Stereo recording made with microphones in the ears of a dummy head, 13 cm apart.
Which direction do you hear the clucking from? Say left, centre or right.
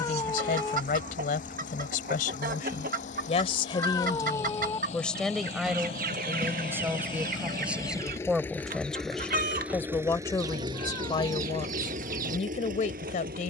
right.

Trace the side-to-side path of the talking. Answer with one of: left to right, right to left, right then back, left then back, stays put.
right then back.